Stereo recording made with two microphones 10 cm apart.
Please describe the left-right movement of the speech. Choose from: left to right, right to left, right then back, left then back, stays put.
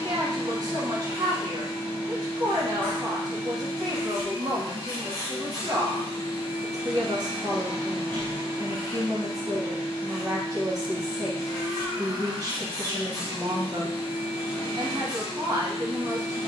stays put.